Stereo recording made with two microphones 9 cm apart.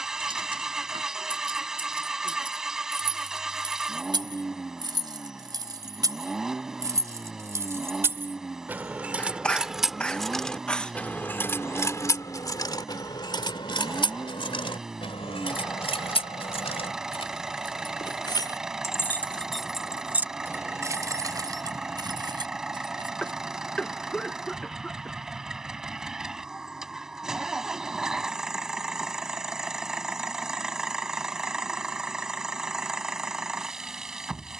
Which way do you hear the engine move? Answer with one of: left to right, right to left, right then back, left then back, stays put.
stays put.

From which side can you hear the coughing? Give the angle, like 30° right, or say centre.
10° left.